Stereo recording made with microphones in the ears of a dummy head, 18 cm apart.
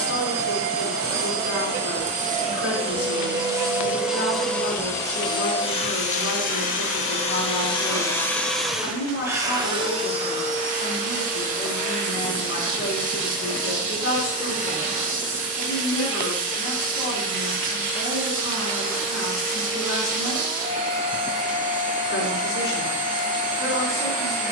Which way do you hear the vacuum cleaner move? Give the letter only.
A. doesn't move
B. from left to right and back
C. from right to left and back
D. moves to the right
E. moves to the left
C.